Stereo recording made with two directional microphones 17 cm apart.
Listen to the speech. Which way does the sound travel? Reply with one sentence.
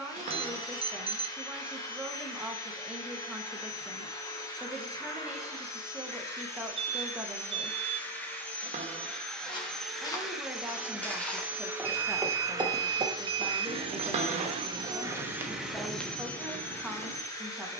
In this clip you hear the speech stay in one place.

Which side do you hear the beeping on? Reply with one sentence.
You can hear the beeping on the right.